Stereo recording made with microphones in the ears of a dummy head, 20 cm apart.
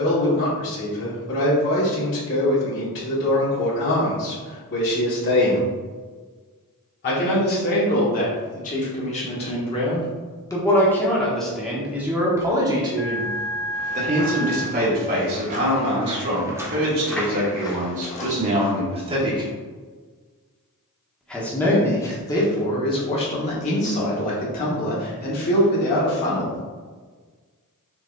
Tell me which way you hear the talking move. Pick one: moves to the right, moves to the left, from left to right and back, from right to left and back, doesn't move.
from left to right and back.